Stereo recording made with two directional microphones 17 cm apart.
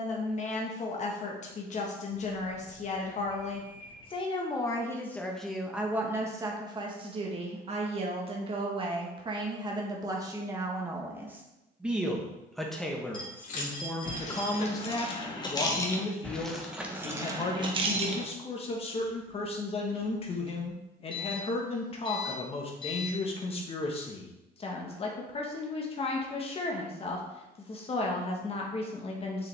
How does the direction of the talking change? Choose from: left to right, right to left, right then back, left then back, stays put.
right then back.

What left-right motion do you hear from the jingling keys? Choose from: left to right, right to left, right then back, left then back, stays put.
left to right.